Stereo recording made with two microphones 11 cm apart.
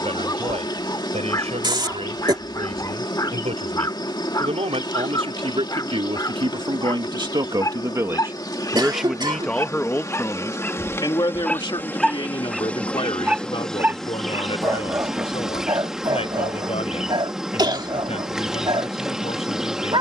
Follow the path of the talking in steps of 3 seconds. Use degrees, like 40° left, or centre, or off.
80° right, 70° right, 40° right, 30° left, 60° left, 70° left, 70° left.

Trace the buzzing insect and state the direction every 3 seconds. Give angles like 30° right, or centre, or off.
40° left, 40° left, 40° left, 30° left, 10° left, 10° right, 10° right.